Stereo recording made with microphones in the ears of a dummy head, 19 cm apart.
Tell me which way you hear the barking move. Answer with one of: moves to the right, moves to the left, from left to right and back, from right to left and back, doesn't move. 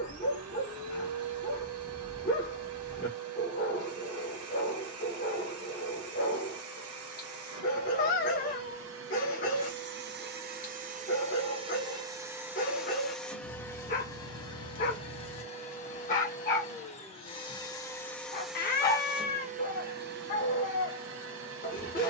doesn't move.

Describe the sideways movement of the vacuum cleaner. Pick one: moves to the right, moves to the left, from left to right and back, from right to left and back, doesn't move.
from right to left and back.